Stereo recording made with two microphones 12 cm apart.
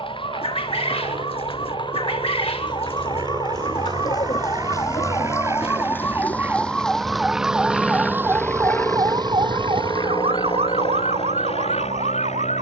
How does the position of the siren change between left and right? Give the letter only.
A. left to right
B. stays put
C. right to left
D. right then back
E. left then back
A.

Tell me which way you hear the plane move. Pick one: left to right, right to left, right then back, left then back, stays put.
right to left.